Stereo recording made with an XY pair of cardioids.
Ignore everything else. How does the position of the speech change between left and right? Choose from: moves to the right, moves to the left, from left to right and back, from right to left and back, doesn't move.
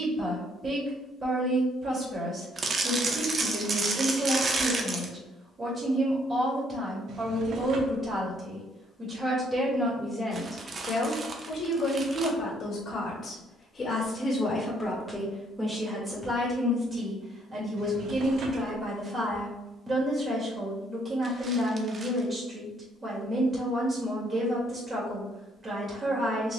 from right to left and back.